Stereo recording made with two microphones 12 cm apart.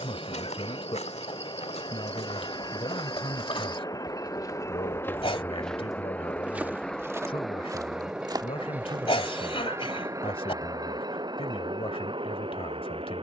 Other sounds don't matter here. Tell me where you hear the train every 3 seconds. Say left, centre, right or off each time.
left, left, centre, right, right.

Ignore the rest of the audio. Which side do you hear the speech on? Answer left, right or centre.
left.